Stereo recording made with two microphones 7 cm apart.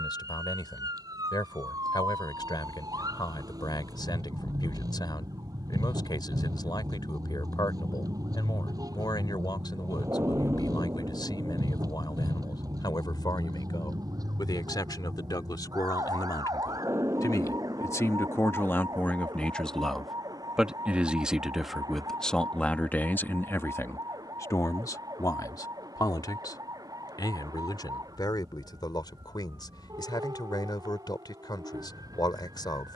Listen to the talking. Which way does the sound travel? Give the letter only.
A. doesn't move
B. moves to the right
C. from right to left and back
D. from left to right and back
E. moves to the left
D.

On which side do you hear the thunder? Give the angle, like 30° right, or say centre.
40° right.